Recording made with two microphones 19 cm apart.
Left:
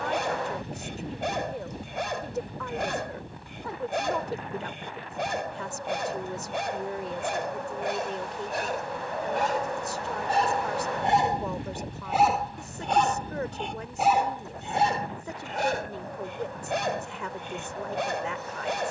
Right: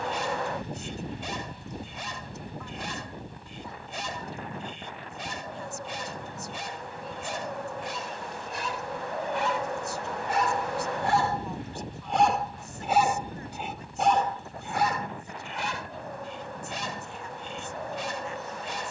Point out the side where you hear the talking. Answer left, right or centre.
left.